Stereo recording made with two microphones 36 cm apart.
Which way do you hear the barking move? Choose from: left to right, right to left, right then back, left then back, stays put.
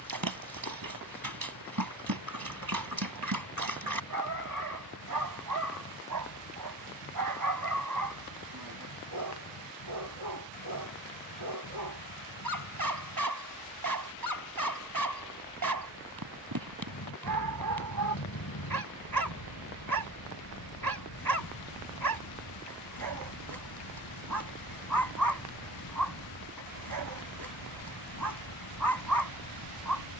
stays put.